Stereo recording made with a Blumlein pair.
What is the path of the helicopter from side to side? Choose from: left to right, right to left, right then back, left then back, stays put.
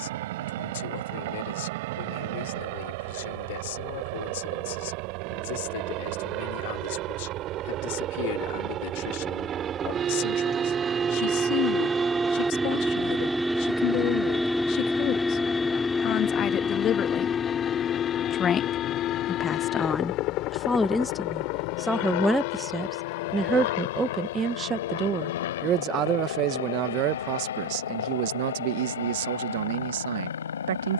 right to left.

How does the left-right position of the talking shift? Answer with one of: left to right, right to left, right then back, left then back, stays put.
left to right.